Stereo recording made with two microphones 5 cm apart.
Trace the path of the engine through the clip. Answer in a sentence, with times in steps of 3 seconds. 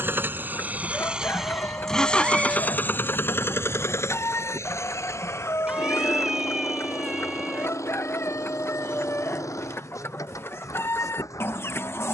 In this clip you hear the engine in the centre from 0 s and on the left from 3 s.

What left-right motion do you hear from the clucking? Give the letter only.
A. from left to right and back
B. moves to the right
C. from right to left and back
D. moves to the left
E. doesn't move
E.